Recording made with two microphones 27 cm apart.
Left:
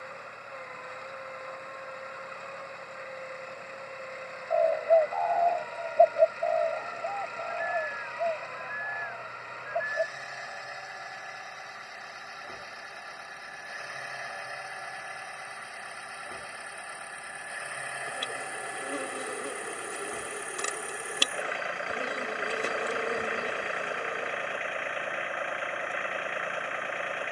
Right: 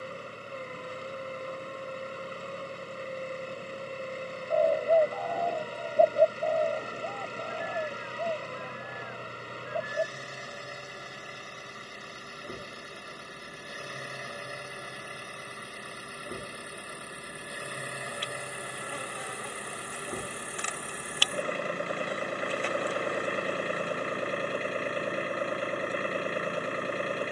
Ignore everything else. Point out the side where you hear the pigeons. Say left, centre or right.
right.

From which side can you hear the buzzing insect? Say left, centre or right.
left.